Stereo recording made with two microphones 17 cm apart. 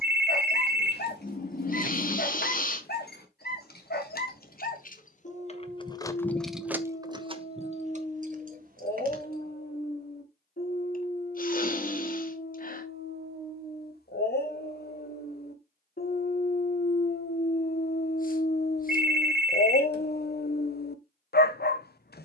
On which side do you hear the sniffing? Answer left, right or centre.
left.